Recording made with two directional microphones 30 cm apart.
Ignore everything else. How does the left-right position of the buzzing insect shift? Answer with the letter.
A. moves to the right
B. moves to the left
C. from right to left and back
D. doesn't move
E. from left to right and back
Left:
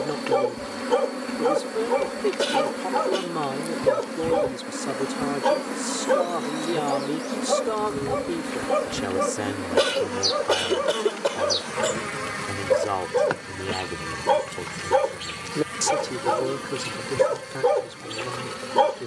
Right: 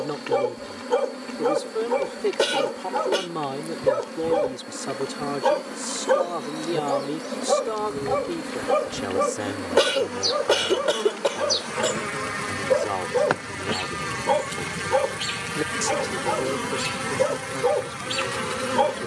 A.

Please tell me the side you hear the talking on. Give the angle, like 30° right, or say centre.
10° left.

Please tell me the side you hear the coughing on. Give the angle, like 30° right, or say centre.
30° right.